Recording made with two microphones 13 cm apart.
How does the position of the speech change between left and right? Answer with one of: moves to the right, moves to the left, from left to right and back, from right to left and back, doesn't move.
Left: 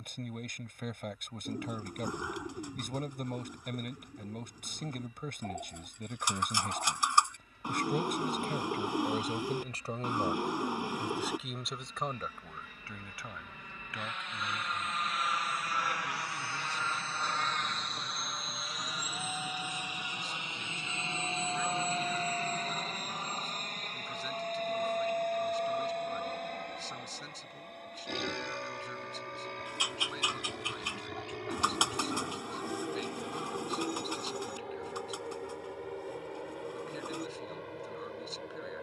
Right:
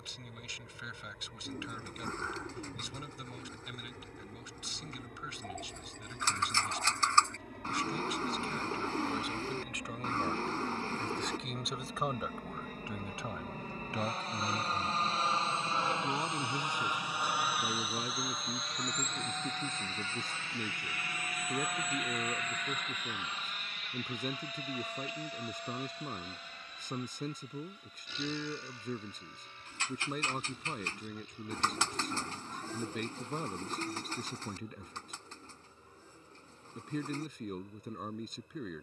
moves to the right.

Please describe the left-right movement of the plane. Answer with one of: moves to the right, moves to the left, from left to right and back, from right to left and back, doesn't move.
moves to the left.